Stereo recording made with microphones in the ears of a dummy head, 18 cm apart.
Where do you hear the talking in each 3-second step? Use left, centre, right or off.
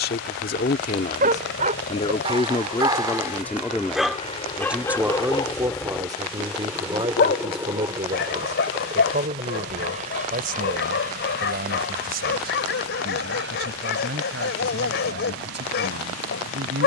left, centre, right, right, right, right.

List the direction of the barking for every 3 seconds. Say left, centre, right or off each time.
right, centre, left, left, left, left.